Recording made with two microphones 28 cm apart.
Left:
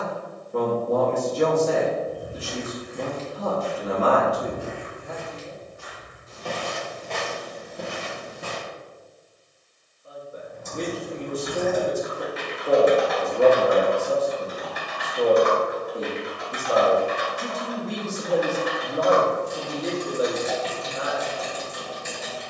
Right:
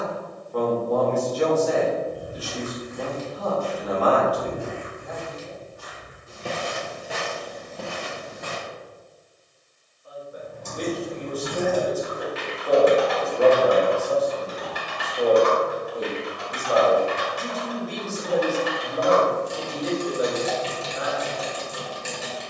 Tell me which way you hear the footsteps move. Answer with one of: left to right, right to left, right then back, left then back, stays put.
right then back.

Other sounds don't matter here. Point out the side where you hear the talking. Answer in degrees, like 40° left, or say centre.
30° left.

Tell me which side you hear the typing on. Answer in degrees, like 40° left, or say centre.
80° right.